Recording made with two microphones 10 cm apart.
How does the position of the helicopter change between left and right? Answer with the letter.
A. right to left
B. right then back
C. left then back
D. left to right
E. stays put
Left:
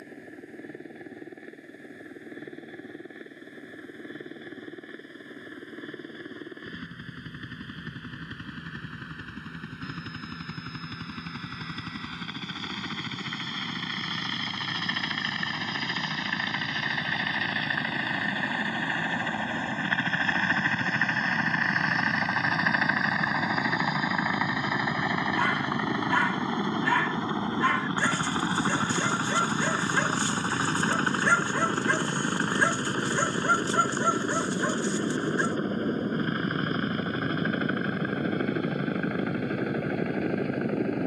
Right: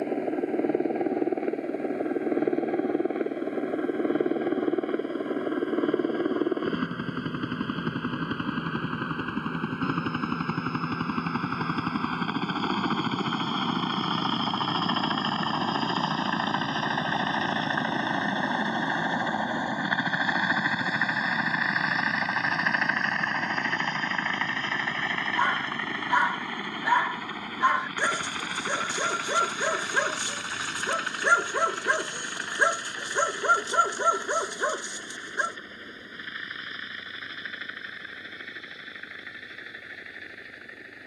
A.